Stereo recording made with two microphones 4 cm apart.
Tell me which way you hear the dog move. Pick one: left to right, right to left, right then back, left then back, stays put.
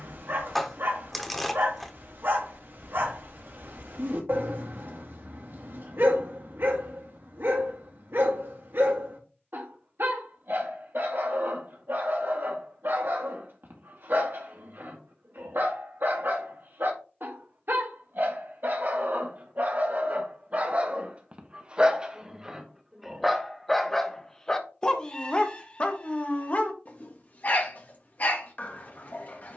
right to left.